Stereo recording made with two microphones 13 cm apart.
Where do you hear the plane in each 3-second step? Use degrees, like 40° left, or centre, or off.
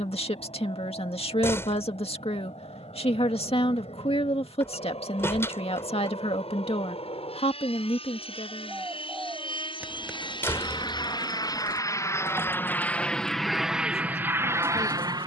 60° left, 60° left, 60° left, 40° left, centre.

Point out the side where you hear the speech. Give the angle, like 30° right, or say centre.
50° left.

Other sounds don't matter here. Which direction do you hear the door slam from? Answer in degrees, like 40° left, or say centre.
20° left.